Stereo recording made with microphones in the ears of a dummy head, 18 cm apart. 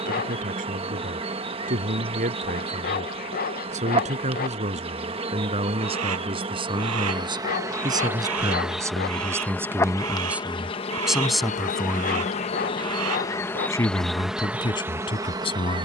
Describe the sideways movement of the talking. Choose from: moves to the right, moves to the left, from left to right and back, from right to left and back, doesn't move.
moves to the left.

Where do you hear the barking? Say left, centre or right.
left.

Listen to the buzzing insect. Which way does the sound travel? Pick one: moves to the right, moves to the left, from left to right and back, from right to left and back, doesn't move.
from right to left and back.